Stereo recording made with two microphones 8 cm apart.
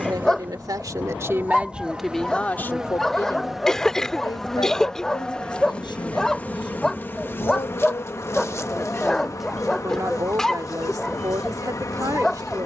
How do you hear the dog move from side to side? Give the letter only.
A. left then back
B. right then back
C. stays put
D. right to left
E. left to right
C.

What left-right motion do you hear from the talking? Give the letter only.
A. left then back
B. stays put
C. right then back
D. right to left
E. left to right
A.